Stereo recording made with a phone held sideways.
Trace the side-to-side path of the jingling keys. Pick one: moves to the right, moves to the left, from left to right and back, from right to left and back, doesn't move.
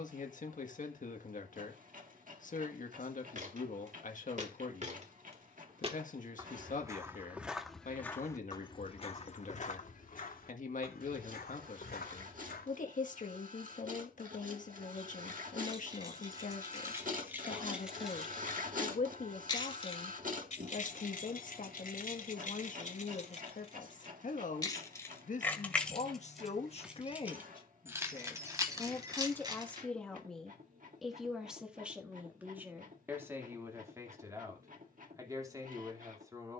from right to left and back.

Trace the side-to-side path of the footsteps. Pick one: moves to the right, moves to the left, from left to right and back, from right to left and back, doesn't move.
moves to the left.